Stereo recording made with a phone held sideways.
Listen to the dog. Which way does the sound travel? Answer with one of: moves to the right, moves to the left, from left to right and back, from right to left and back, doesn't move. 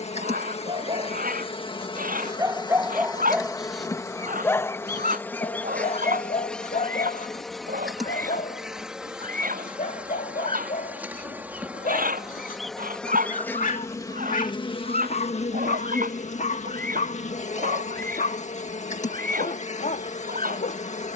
moves to the left.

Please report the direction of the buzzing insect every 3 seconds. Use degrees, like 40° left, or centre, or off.
40° left, 20° left, centre, 10° right, 20° left, 60° left, 60° left.